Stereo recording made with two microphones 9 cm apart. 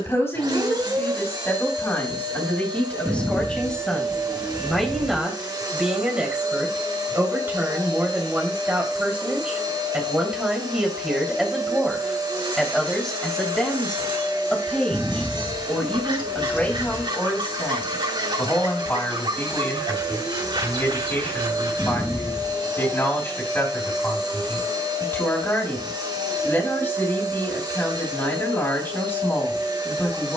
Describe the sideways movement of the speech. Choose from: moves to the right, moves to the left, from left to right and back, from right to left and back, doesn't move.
from left to right and back.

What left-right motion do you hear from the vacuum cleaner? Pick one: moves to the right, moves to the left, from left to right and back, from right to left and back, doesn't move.
doesn't move.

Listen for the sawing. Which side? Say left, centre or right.
right.